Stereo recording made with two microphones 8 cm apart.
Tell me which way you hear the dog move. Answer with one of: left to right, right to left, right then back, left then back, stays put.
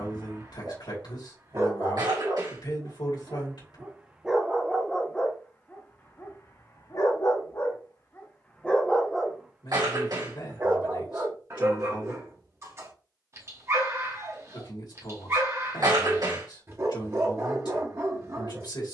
left then back.